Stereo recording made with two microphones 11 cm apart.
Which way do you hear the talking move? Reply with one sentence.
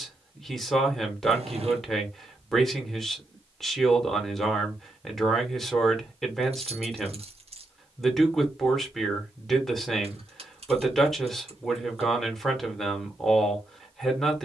You can hear the talking stay in one place.